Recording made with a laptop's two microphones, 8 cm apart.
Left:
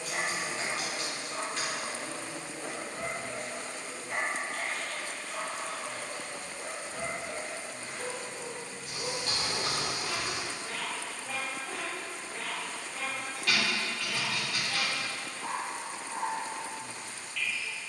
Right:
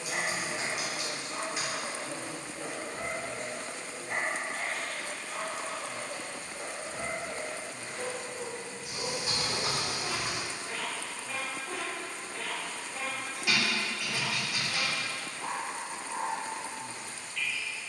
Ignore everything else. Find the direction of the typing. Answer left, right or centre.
centre.